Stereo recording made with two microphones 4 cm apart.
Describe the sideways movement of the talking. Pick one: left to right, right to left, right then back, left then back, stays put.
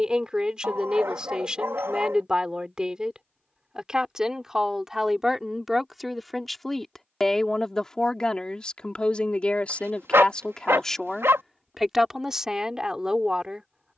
left then back.